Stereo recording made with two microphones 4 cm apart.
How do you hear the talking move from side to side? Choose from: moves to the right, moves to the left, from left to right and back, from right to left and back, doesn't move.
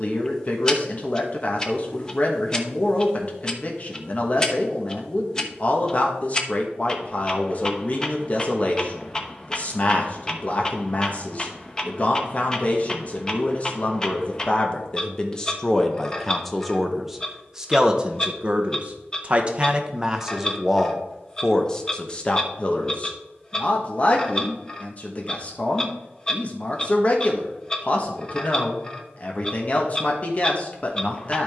from left to right and back.